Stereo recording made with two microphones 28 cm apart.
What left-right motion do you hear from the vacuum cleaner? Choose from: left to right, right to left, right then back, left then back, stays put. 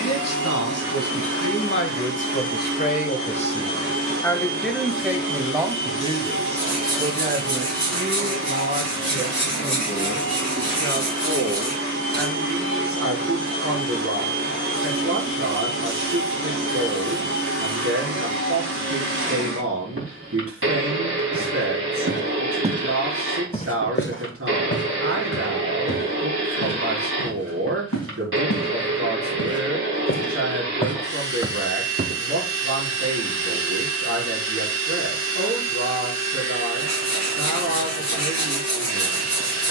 stays put.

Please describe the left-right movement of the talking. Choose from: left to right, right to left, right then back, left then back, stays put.
left to right.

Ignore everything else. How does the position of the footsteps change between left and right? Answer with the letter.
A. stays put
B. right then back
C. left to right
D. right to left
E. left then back
E.